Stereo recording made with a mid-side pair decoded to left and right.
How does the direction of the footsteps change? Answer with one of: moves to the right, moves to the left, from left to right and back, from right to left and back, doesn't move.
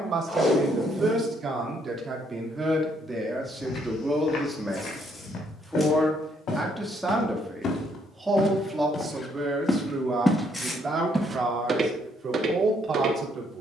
moves to the right.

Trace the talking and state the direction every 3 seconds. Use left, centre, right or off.
right, centre, centre, right, right.